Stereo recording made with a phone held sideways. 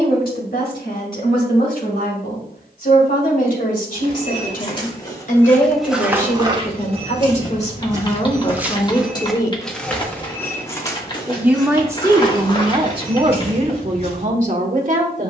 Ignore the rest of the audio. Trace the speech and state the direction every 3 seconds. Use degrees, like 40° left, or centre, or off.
70° left, 60° left, 40° left, centre, 40° right.